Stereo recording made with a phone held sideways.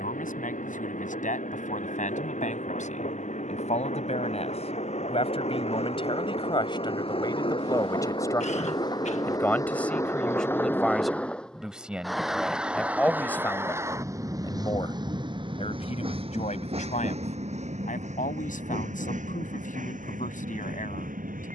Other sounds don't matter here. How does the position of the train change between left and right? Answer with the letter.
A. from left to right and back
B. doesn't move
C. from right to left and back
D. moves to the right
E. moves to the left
D.